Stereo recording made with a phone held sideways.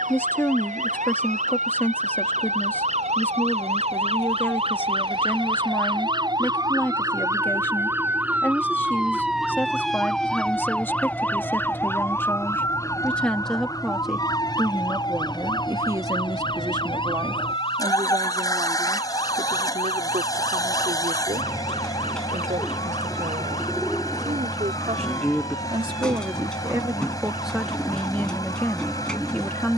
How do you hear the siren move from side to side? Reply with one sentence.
In this clip you hear the siren travel towards the left.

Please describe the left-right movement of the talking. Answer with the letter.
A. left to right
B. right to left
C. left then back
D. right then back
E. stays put
D.